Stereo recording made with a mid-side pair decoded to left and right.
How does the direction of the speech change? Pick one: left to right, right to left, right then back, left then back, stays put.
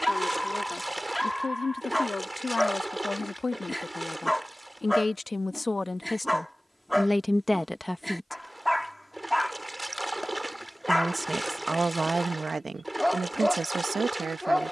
left to right.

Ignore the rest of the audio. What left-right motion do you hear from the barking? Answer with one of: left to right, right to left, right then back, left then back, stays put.
stays put.